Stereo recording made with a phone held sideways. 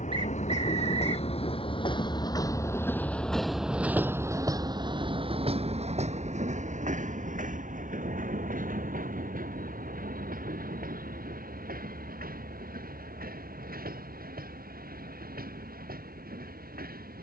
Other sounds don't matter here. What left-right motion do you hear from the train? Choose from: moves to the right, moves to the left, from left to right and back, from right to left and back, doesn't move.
moves to the right.